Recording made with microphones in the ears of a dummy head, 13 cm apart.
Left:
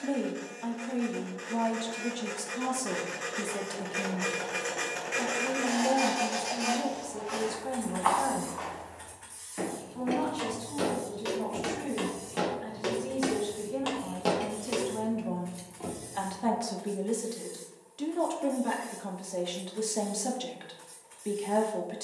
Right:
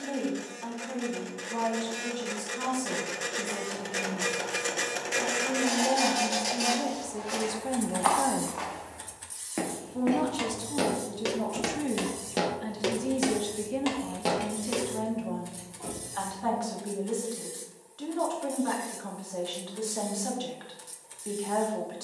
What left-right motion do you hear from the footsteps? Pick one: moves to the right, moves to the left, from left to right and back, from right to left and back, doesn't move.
from left to right and back.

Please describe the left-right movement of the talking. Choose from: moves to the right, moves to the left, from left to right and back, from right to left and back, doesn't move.
from left to right and back.